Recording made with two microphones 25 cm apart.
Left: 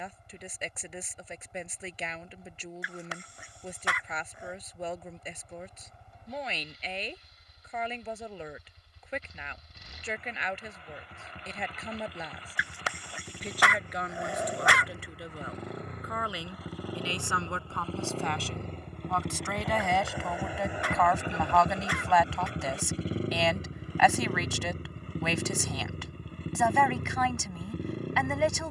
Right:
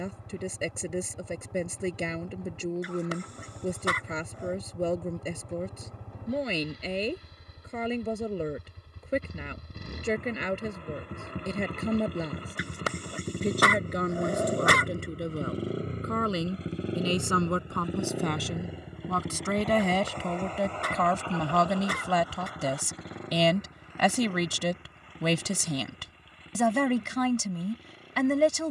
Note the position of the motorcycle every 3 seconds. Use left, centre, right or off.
right, right, right, right, right, right, centre, left, left, left.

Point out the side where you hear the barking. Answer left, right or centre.
right.